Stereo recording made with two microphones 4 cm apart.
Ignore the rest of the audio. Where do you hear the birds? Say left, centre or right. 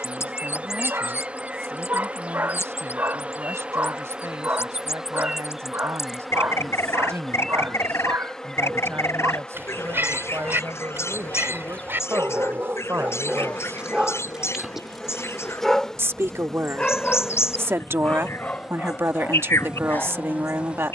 left.